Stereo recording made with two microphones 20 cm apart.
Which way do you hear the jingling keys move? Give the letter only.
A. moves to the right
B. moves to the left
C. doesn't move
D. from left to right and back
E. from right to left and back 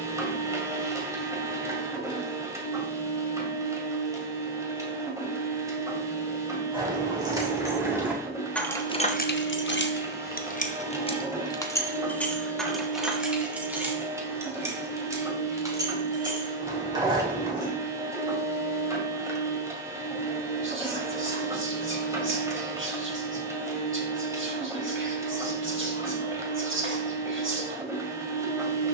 E.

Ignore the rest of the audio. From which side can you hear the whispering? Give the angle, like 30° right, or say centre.
80° right.